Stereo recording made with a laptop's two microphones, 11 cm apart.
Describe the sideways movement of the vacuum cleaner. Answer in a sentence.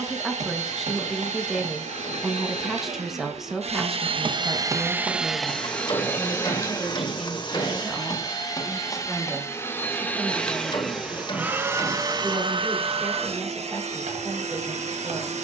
In this clip you hear the vacuum cleaner go left and come back.